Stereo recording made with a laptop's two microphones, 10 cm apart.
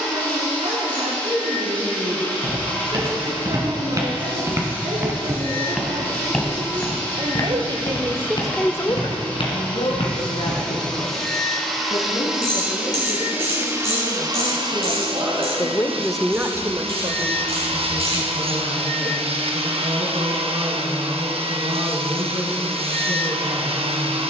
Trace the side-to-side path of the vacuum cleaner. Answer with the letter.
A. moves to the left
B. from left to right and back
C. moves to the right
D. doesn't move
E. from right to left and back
C.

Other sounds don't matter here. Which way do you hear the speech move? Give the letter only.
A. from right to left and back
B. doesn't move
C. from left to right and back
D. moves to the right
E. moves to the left
A.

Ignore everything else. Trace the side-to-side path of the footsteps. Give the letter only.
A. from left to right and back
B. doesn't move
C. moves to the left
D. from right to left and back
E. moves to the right
C.